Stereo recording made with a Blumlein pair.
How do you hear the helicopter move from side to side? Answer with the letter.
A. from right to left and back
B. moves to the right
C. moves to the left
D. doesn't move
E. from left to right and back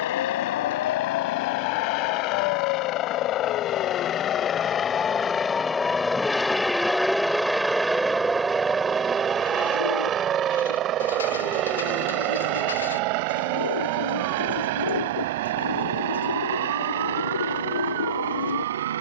B.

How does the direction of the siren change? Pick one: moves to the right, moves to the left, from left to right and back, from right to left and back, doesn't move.
moves to the right.